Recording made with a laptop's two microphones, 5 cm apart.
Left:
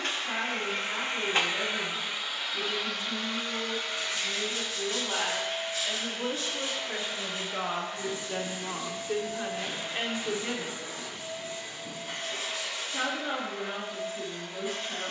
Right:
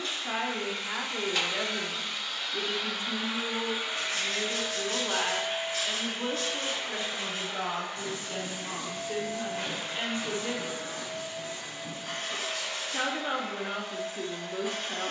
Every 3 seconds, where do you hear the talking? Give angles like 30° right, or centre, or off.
50° right, 30° right, 10° left, 20° left, 30° right.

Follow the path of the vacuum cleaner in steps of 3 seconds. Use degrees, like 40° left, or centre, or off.
20° left, 20° right, 40° right, 50° right, 60° right.